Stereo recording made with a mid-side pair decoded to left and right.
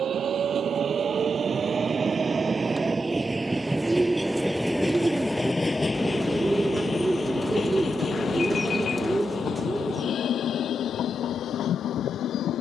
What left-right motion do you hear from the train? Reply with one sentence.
You can hear the train move to the left.